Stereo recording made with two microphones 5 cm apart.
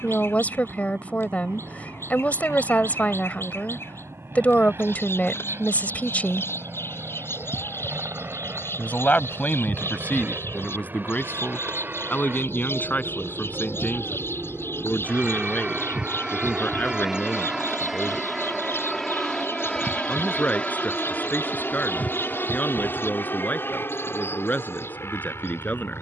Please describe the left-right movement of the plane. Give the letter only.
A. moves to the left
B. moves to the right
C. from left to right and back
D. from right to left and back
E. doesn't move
A.